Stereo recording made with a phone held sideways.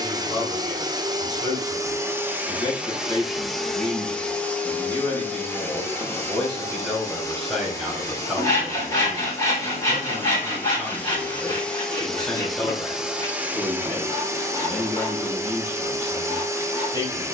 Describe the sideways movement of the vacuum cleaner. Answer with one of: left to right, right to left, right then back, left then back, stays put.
left then back.